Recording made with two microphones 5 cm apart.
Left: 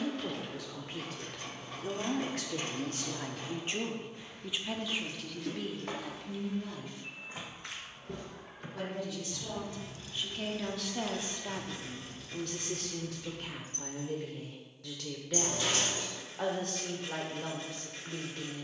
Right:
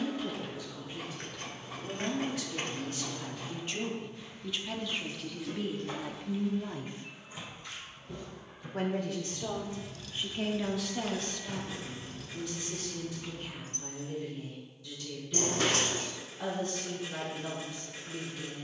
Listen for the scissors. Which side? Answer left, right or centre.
right.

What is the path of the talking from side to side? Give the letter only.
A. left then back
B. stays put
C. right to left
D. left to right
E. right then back
E.